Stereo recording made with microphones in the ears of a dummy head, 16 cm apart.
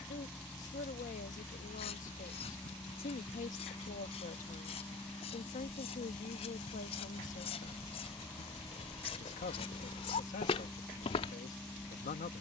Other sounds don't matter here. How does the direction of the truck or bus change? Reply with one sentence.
In this clip you hear the truck or bus stay put.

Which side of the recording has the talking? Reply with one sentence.
In this clip you hear the talking on the left.